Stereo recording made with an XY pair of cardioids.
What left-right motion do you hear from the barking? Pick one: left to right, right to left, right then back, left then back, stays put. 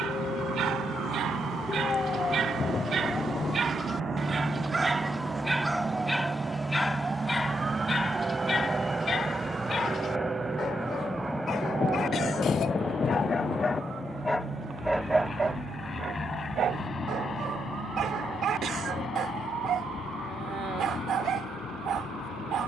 left then back.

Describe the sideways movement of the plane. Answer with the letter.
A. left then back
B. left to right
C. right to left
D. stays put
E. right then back
C.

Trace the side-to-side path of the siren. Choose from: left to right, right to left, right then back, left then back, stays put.
left to right.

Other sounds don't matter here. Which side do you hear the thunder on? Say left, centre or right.
left.